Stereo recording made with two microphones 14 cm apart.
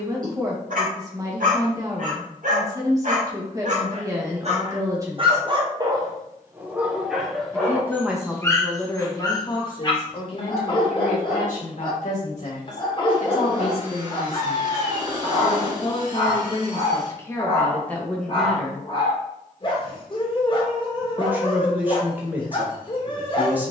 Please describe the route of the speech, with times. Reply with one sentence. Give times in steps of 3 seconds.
You can hear the speech on the right from 0 s, in the centre from 6 s, on the left from 9 s and in the centre from 18 s.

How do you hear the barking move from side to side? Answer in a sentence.
In this clip you hear the barking move to the left.